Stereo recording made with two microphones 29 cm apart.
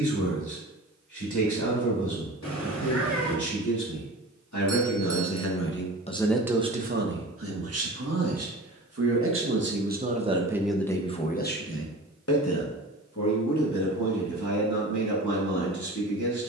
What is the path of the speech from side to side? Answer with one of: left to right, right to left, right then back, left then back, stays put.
right then back.